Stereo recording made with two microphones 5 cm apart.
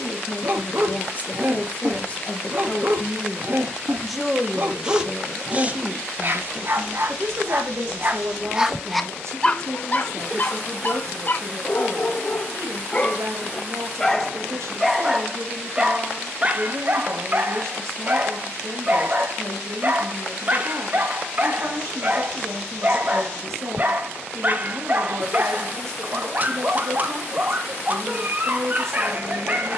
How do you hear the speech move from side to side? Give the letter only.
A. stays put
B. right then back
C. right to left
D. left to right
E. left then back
D.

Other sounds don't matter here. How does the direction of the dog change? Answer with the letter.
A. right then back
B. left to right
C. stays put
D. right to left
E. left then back
E.